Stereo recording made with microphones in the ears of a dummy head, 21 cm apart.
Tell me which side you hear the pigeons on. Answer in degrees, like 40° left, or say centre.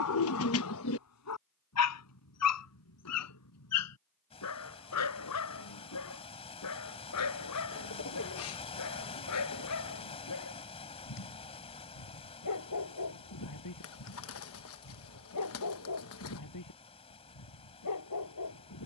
60° left.